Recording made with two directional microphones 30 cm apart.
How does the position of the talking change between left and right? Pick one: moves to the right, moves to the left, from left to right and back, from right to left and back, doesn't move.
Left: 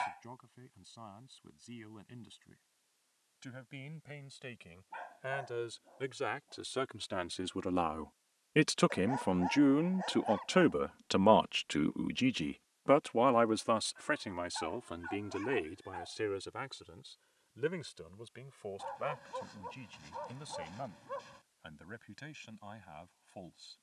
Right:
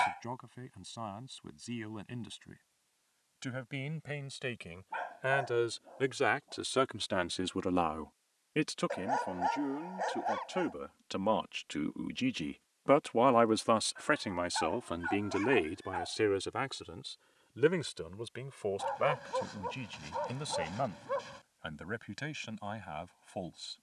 from right to left and back.